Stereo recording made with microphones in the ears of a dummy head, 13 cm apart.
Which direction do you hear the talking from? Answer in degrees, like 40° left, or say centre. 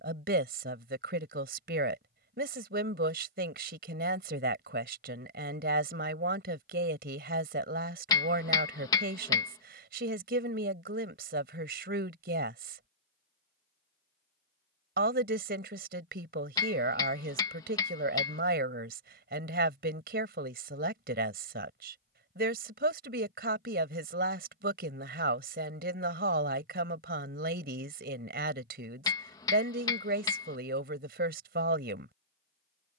80° right.